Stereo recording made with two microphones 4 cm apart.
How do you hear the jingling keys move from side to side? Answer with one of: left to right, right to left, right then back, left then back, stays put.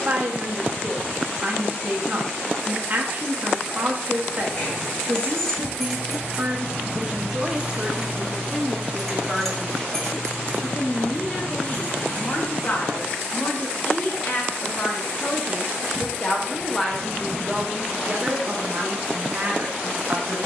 right then back.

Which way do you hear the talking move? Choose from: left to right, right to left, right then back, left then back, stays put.
left then back.